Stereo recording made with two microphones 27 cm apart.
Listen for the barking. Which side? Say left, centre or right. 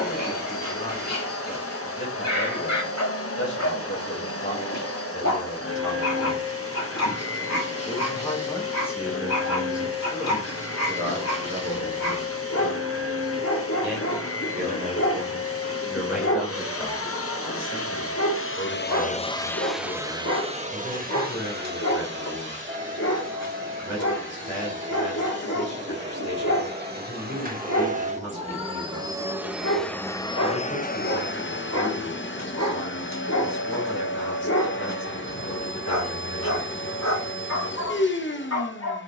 left.